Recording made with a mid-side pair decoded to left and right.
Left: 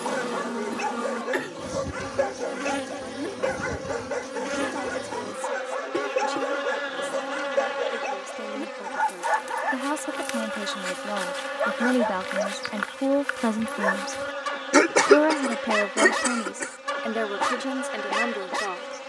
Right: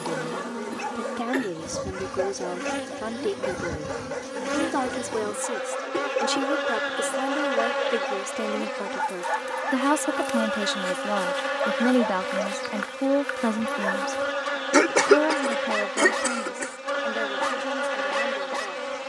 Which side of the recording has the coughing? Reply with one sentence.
You can hear the coughing in the centre.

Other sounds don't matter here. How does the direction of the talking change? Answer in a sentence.
In this clip you hear the talking travel towards the left.